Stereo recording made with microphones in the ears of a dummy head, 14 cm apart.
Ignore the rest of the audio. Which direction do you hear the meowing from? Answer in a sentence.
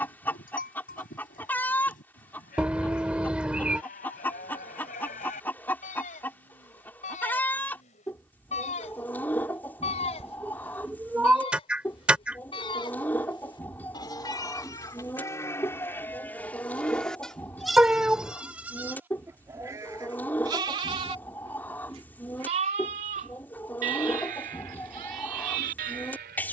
You can hear the meowing in the centre.